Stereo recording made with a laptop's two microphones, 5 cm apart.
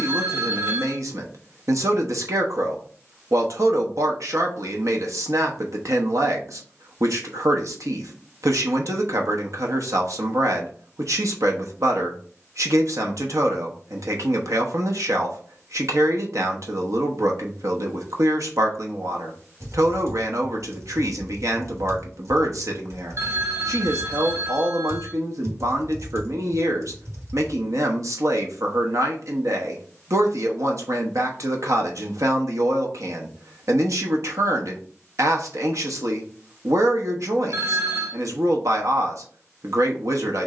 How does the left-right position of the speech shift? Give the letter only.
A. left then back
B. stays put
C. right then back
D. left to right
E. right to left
B.